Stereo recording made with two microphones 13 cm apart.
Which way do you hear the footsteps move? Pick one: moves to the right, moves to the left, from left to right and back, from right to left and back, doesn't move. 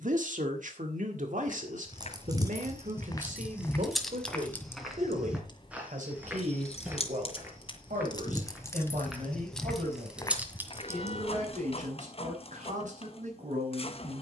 from left to right and back.